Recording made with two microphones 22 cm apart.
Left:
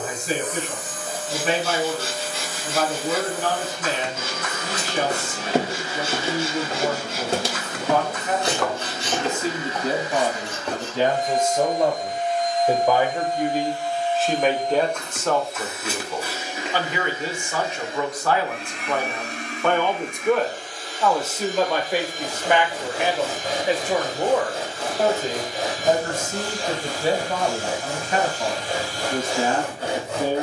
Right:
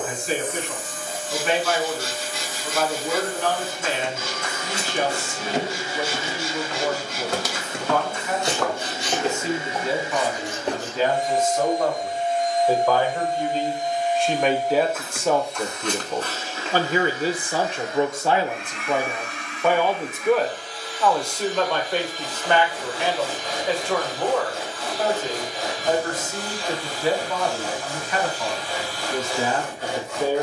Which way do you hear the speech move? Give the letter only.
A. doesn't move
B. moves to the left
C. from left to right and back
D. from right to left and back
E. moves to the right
C.